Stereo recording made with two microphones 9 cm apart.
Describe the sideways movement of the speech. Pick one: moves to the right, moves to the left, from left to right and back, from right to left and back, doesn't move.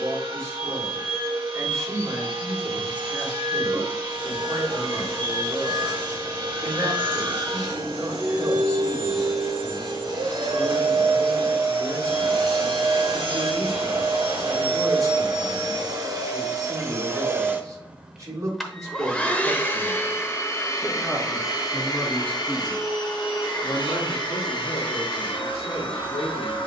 moves to the left.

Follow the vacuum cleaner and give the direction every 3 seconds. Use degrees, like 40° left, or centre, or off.
60° right, 60° right, 60° right, 60° right, 60° right, 40° right, 20° left, 50° left, 60° left.